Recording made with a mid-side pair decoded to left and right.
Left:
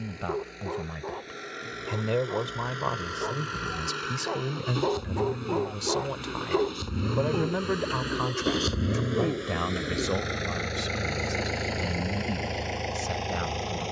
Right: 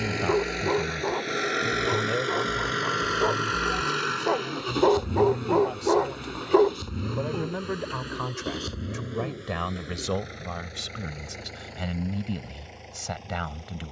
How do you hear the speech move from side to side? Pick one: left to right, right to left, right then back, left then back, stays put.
left then back.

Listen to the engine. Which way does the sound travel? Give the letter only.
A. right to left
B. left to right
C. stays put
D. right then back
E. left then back
A.